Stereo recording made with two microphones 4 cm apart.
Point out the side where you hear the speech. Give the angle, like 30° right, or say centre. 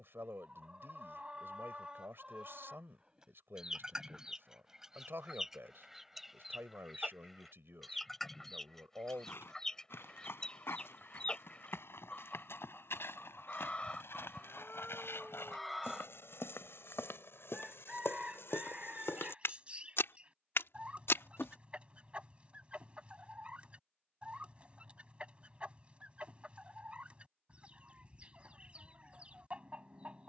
70° right.